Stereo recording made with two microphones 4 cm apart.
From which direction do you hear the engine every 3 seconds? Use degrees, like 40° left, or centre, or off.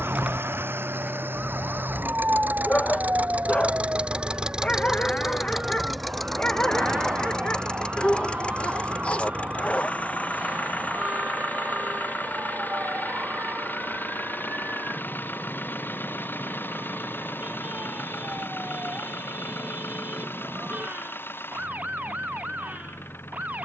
60° right, 20° right, 20° left, 40° left, 50° left, 50° left, 50° left, 60° left.